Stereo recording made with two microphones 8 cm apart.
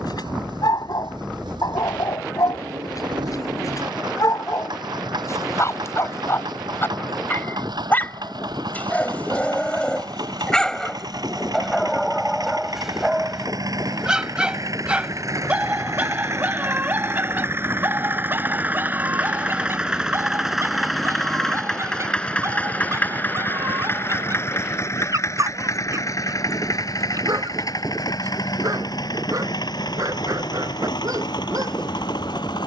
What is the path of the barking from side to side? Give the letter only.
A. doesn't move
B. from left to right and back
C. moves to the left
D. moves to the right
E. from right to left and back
D.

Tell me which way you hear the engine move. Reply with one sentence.
In this clip you hear the engine move from right to left.